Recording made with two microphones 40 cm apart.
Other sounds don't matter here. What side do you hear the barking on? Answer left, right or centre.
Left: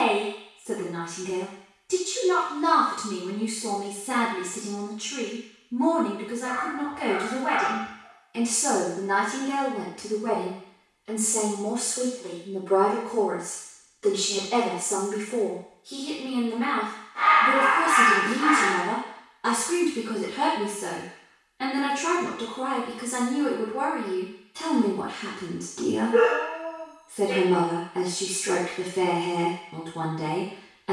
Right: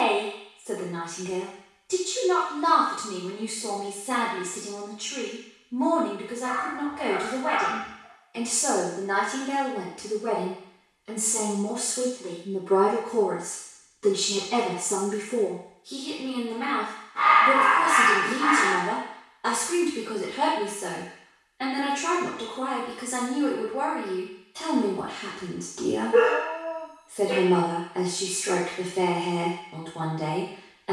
right.